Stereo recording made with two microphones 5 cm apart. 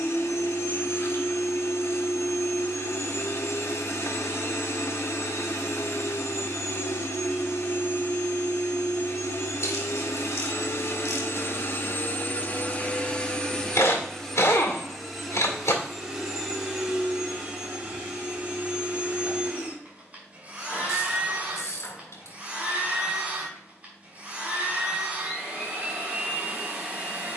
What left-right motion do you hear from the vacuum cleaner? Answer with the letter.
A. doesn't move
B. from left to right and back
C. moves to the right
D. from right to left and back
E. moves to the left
C.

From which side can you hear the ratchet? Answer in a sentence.
You can hear the ratchet on the left.